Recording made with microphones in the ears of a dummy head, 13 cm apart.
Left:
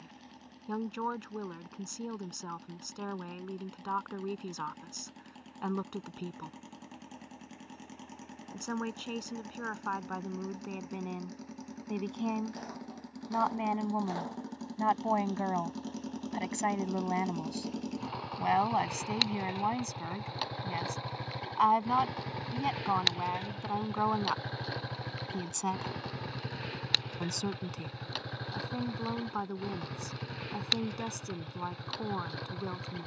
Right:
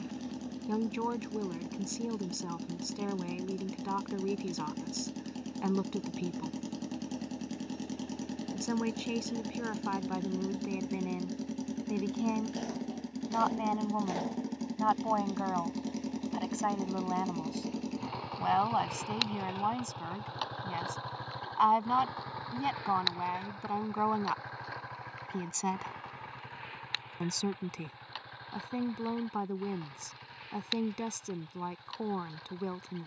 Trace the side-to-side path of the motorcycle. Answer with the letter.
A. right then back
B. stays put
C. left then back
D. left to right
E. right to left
E.